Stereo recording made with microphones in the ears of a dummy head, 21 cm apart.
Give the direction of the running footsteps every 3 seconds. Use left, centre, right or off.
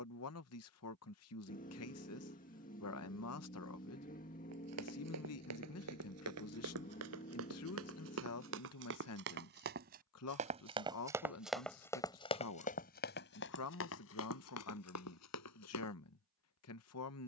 off, right, right, right, left, left.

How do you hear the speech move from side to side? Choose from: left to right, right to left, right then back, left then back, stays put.
stays put.